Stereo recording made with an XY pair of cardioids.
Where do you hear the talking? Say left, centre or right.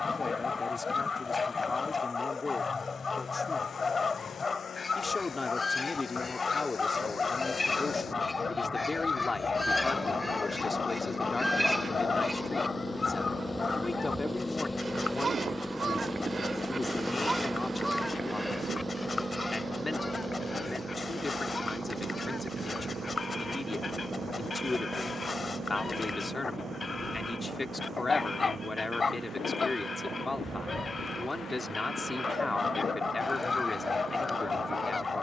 left.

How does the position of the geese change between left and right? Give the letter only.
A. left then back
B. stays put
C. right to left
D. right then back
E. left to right
D.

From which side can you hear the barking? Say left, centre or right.
left.